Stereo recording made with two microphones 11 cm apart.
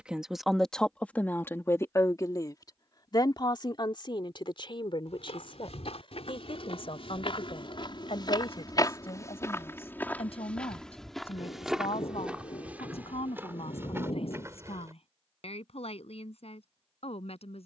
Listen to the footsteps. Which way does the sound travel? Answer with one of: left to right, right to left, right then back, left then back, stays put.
left to right.